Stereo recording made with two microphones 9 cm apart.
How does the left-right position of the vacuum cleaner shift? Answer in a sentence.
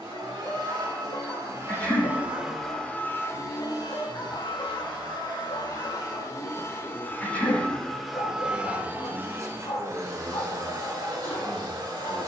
You can hear the vacuum cleaner go left and come back.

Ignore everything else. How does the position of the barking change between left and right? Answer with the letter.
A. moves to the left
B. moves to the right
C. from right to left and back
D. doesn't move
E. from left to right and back
D.